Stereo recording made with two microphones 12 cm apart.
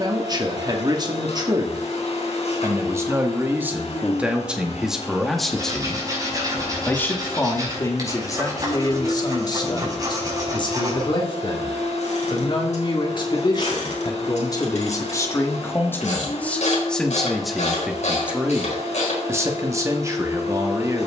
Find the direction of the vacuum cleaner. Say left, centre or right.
left.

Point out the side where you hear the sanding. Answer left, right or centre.
right.